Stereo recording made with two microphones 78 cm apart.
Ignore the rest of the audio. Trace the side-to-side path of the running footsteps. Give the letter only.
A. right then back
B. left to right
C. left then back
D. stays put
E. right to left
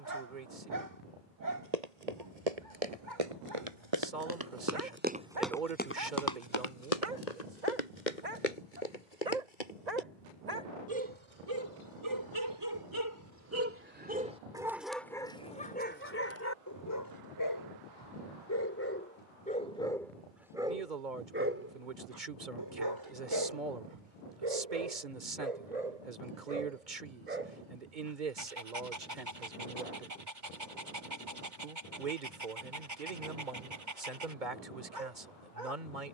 E.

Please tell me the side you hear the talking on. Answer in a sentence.
In this clip you hear the talking on the right.